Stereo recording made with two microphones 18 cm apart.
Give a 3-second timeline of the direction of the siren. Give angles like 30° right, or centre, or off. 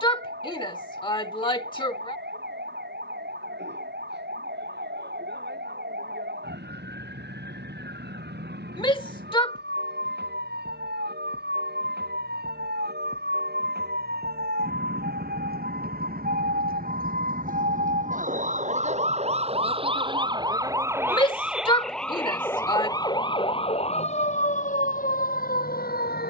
80° right, 80° right, 70° right, 70° right, 70° right, 60° right, 30° right, 10° left, 50° left.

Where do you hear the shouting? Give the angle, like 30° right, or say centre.
30° left.